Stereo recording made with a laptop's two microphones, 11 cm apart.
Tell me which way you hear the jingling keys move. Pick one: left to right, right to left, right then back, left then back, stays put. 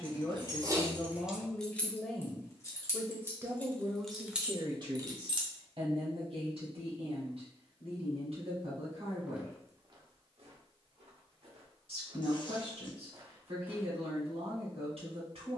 left then back.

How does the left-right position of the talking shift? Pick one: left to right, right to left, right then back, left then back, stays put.
left to right.